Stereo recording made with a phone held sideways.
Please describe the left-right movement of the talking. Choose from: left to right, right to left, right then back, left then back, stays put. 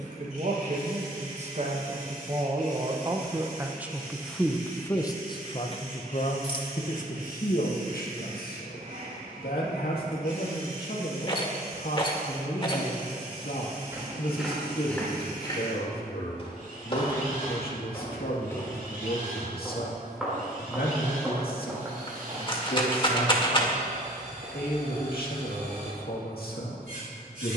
right to left.